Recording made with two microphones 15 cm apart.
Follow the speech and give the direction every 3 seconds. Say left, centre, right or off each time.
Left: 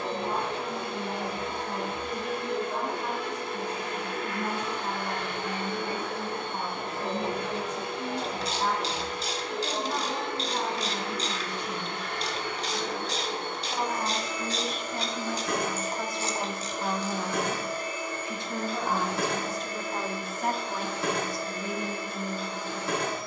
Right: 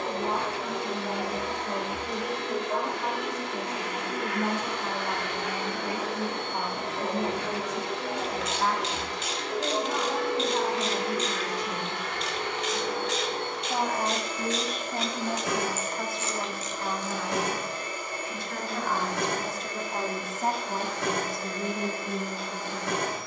right, right, right, right, right, centre, centre, right.